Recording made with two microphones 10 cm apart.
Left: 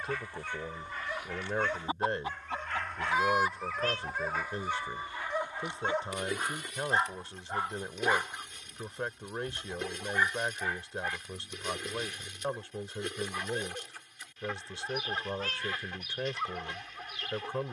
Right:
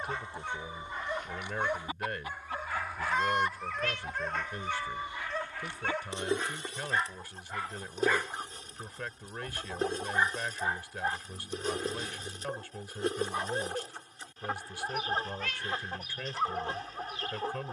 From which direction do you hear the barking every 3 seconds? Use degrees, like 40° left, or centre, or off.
20° right, 10° left, 20° left, 20° right, 30° right, 30° right.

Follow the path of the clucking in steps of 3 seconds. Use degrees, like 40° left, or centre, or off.
10° left, 10° right, 30° right, 40° right, 40° right, 40° right.